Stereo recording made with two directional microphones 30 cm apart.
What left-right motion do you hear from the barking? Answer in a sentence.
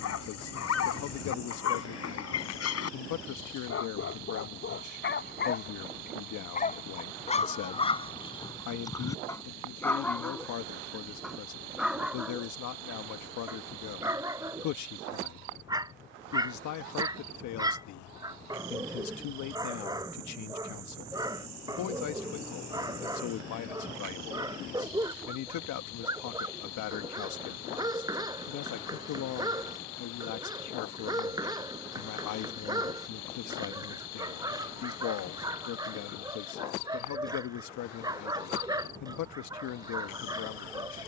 In this clip you hear the barking go from the left side to the right.